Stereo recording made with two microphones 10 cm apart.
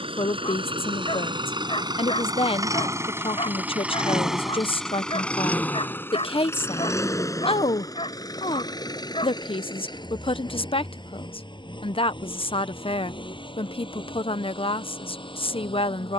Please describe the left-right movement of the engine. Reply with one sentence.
In this clip you hear the engine go from the right side to the left.